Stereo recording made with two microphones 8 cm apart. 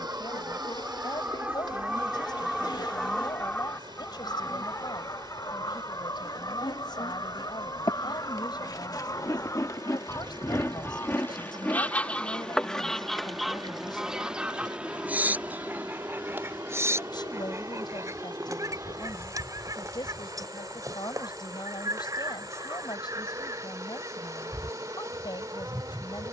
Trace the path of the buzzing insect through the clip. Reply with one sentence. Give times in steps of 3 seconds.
In this clip you hear the buzzing insect on the left from 0 s, in the centre from 12 s and on the right from 15 s.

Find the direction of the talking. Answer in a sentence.
You can hear the talking on the left.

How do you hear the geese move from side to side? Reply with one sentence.
In this clip you hear the geese go left and come back.